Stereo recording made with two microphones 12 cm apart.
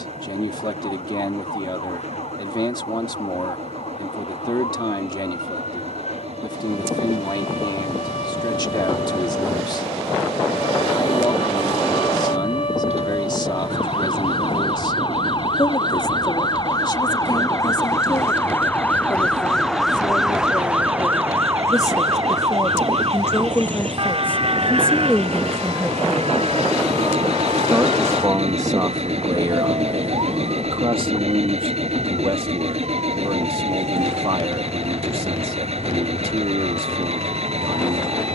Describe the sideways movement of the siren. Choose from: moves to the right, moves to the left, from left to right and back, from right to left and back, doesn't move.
moves to the right.